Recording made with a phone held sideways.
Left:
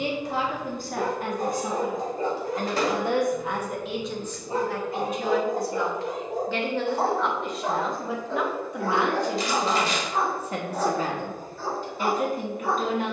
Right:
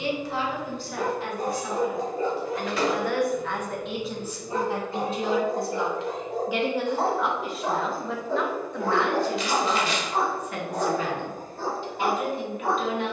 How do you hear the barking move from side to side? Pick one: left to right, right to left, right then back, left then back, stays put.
left to right.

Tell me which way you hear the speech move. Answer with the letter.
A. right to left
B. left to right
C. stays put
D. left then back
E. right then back
E.